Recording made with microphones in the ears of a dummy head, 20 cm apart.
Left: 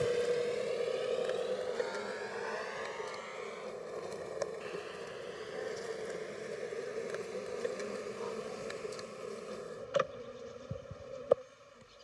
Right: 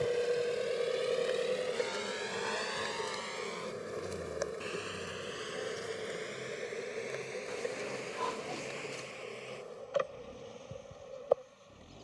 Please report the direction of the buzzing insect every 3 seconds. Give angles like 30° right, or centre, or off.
centre, 10° right, 10° left, 20° left.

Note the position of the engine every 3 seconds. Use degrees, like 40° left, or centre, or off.
30° right, 60° right, 70° right, 80° right.